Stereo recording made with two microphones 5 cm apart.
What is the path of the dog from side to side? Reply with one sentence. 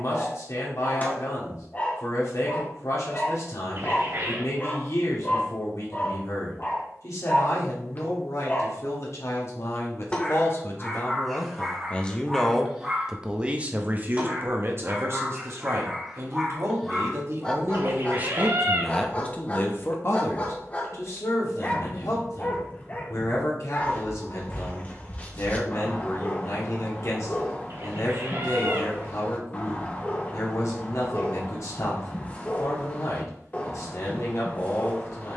In this clip you hear the dog move from left to right and back again.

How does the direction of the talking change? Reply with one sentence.
In this clip you hear the talking move from left to right and back again.